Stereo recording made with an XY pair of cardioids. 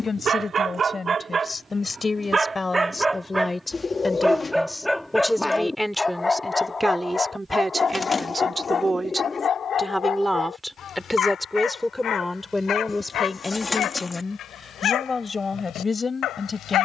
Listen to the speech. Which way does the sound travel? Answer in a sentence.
In this clip you hear the speech move from left to right and back again.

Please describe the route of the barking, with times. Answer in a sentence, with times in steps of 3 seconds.
In this clip you hear the barking on the right from 0 s, in the centre from 3 s and on the left from 6 s.